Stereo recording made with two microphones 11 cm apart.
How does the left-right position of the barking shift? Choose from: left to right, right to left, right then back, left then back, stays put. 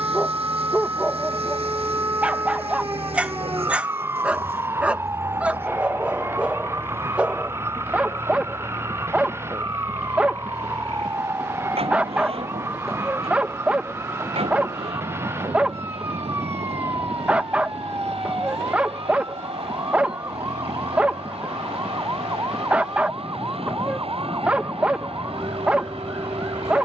stays put.